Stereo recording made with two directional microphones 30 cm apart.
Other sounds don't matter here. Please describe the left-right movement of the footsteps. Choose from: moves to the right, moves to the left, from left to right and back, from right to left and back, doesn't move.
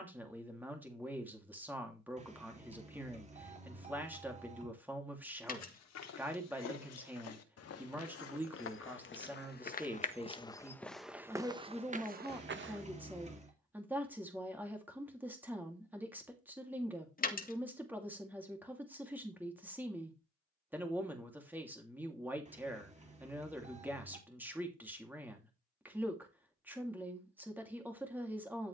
moves to the right.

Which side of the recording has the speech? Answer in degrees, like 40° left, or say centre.
10° right.